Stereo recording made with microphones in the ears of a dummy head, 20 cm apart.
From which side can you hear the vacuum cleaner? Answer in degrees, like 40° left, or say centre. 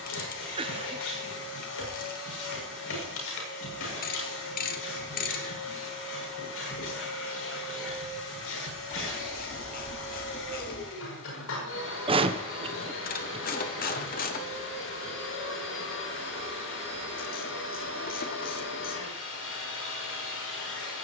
70° left.